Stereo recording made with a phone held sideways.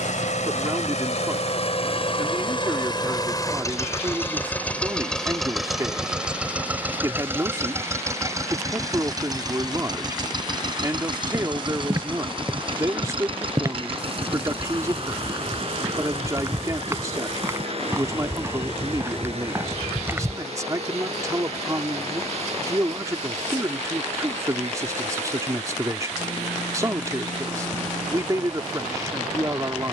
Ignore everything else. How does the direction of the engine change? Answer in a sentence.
You can hear the engine go from the left side to the right.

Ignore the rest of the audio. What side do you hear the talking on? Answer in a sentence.
You can hear the talking on the right.